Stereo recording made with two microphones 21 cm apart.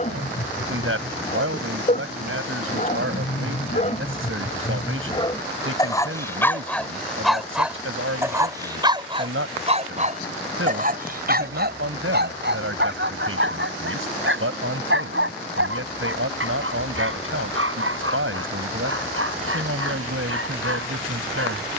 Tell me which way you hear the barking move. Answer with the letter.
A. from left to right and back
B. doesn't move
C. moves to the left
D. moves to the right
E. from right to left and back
D.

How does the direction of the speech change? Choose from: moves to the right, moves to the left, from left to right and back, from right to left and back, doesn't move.
doesn't move.